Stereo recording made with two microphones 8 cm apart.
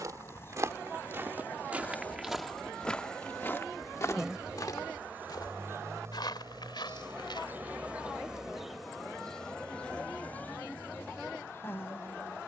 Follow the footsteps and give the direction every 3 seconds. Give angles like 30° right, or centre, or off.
20° right, 40° left, 70° left, off.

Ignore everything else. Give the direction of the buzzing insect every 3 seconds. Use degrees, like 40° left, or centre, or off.
20° left, 10° right, 20° right, 20° left.